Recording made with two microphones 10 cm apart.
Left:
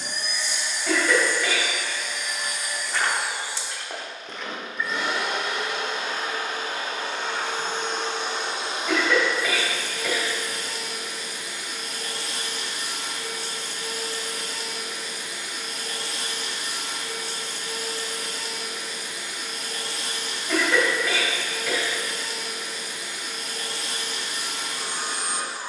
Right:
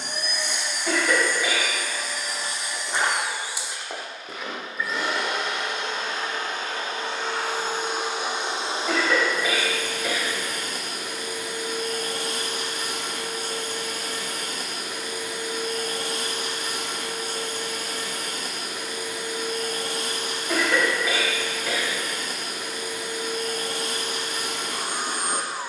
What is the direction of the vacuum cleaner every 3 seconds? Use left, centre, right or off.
right, centre, centre, right, right, right, right, right, right.